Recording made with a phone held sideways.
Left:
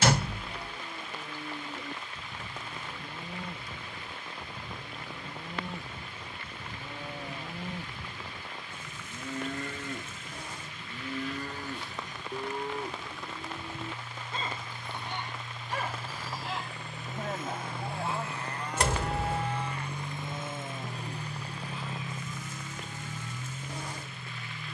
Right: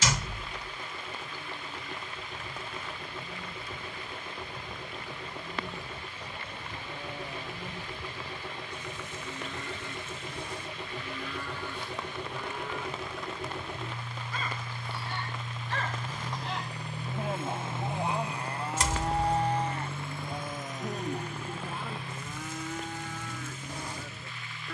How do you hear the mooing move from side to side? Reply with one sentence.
In this clip you hear the mooing move to the right.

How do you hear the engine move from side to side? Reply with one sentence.
You can hear the engine travel towards the left.